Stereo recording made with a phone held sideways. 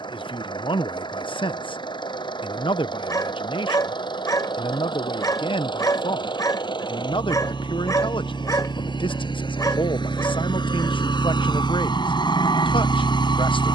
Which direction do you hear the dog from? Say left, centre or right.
left.